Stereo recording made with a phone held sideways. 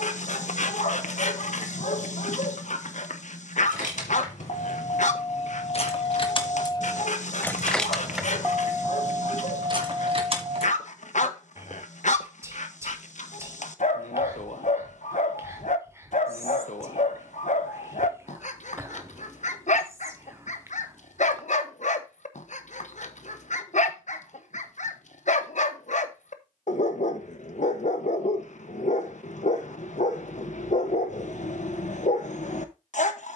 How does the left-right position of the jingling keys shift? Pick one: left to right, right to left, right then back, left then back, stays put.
left to right.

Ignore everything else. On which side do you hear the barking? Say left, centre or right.
left.